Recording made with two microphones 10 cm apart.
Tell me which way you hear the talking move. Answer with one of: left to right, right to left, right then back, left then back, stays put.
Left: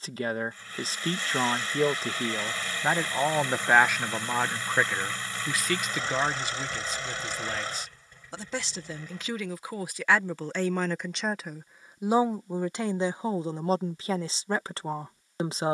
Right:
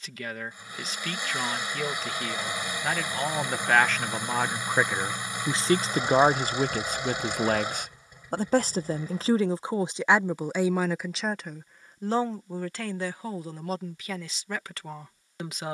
right then back.